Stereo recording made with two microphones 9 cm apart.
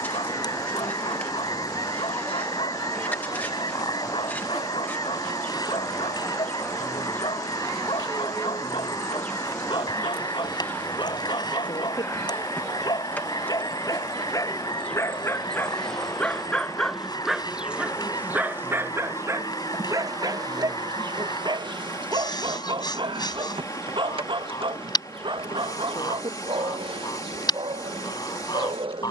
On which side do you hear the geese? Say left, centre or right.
left.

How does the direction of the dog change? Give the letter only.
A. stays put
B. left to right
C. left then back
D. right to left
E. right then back
B.